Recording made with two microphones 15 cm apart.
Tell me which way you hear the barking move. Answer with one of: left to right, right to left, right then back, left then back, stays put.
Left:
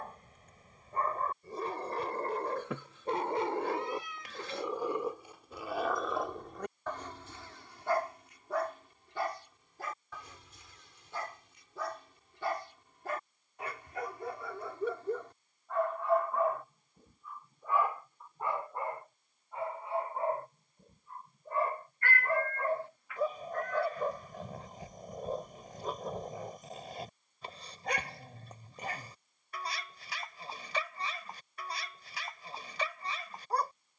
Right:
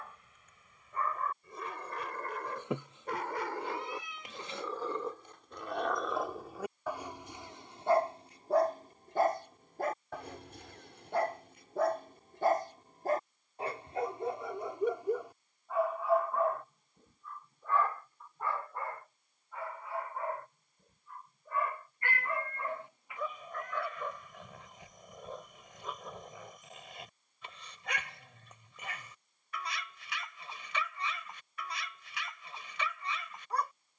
right then back.